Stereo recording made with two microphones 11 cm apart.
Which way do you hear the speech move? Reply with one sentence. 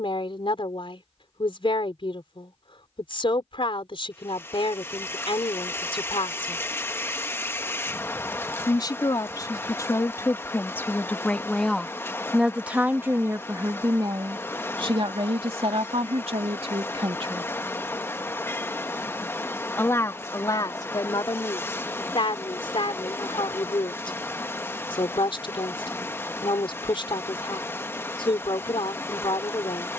In this clip you hear the speech go right and come back.